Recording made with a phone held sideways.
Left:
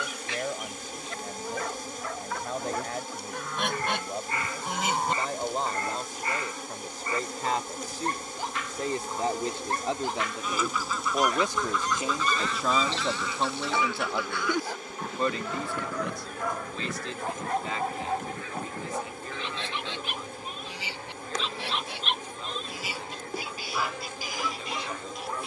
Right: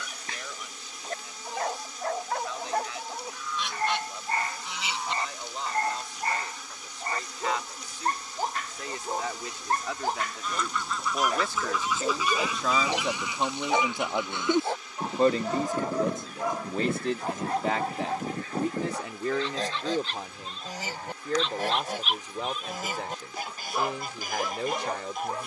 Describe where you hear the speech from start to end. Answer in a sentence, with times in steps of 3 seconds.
You can hear the speech on the left from 0 s, in the centre from 12 s and on the right from 15 s.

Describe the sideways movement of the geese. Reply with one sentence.
You can hear the geese travel towards the right.